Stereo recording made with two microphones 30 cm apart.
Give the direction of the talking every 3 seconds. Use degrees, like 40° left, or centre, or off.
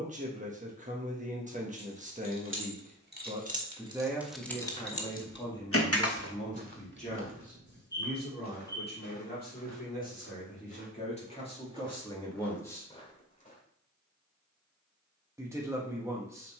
20° right, centre, 30° left, 20° left, 10° left, 10° right.